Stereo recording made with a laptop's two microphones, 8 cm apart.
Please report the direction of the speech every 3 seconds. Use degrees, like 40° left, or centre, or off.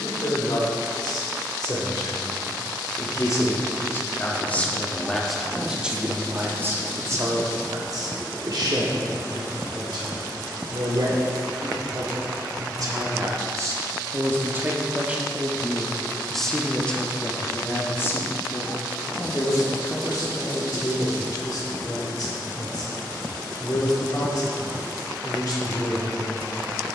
50° left, 20° left, 40° right, 60° right, 40° right, 10° left, 40° left, 50° left, 50° left.